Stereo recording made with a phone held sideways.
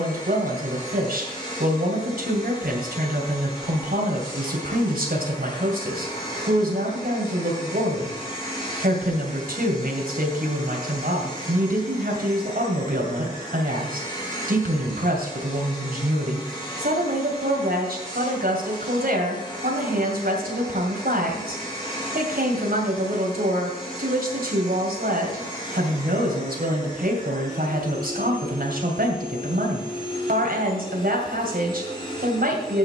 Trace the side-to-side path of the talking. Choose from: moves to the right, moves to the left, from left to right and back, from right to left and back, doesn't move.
doesn't move.